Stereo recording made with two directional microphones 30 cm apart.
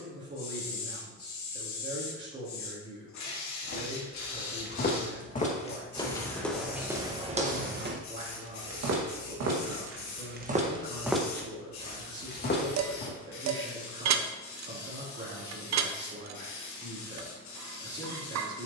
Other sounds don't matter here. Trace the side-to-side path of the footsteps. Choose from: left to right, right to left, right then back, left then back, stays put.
right then back.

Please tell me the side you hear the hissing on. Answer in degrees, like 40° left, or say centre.
70° left.